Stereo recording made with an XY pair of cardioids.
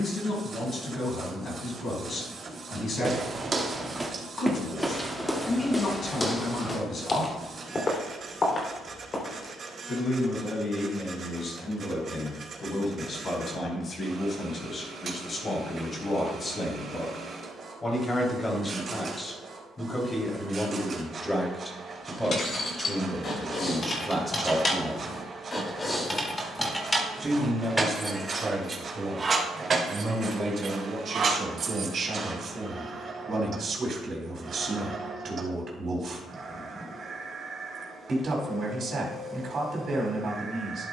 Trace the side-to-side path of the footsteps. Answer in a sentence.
In this clip you hear the footsteps travel towards the left.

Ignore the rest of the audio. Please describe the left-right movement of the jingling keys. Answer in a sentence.
You can hear the jingling keys move to the right.